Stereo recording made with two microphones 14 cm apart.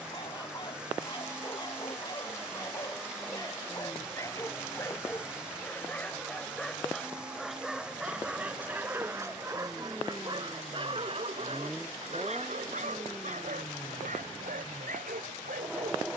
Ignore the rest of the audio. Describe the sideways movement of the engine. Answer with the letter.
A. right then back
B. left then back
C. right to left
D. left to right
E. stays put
E.